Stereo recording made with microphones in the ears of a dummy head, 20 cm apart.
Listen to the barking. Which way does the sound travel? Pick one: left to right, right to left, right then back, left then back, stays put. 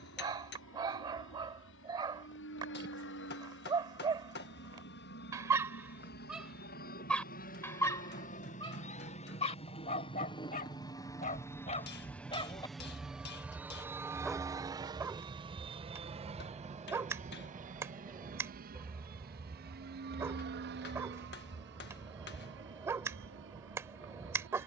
left then back.